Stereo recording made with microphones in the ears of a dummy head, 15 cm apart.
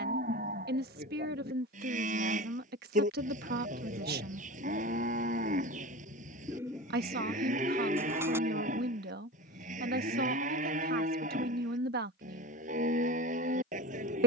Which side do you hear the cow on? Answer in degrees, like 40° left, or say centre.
40° right.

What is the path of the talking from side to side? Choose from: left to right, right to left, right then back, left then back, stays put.
stays put.